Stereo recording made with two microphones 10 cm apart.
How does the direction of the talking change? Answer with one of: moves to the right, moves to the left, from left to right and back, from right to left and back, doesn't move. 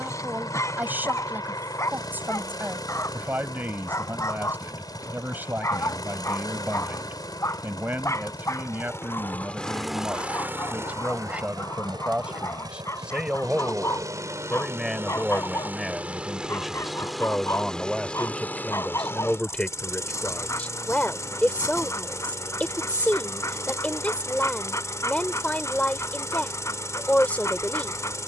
moves to the left.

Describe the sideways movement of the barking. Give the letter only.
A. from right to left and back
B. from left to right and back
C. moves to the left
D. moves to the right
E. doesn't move
E.